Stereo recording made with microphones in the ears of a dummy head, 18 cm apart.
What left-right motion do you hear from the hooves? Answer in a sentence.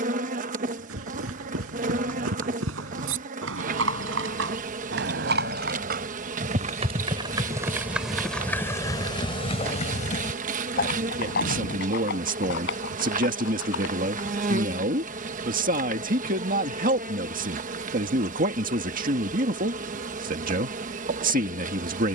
You can hear the hooves move to the left.